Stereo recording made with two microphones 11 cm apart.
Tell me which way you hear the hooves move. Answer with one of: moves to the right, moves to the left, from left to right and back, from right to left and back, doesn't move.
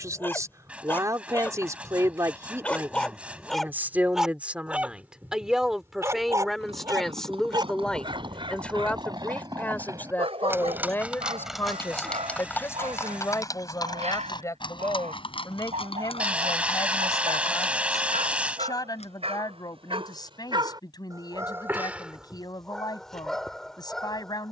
moves to the left.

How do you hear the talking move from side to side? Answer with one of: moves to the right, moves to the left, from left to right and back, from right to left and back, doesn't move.
moves to the left.